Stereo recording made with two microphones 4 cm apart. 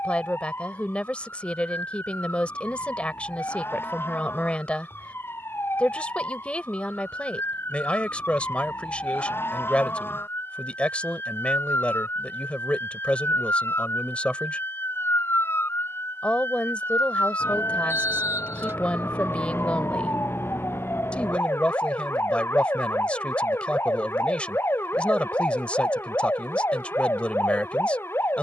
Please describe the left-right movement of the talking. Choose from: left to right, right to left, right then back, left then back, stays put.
stays put.